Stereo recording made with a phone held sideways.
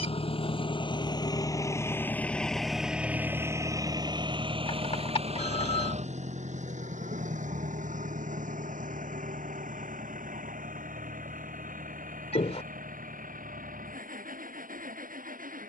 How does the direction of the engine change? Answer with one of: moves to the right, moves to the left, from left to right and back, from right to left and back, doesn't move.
moves to the right.